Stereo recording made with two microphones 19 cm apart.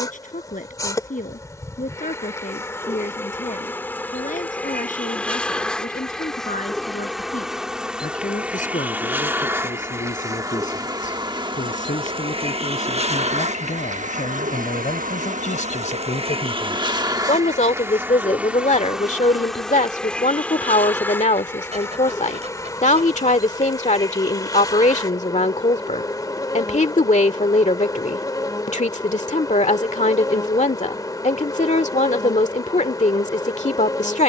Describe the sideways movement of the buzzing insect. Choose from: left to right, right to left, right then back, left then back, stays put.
right then back.